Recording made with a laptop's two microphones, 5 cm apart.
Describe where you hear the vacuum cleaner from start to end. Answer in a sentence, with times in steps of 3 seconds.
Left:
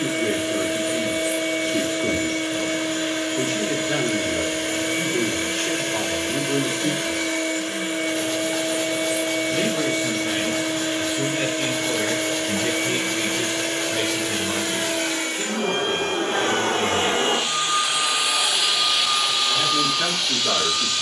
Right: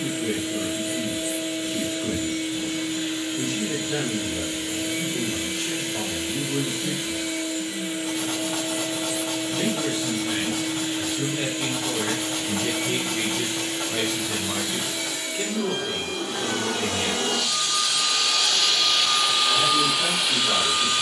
You can hear the vacuum cleaner on the left from 0 s and in the centre from 18 s.